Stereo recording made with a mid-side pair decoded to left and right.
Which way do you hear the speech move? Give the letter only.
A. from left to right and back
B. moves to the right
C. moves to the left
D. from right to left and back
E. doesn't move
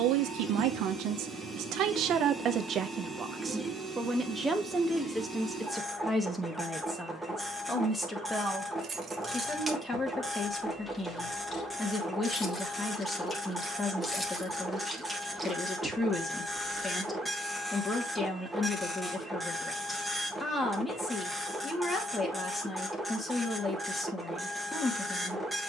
C.